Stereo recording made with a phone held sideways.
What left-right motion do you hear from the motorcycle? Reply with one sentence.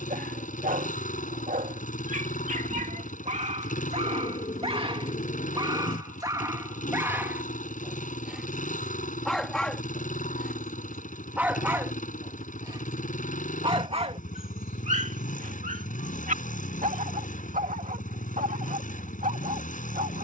You can hear the motorcycle stay put.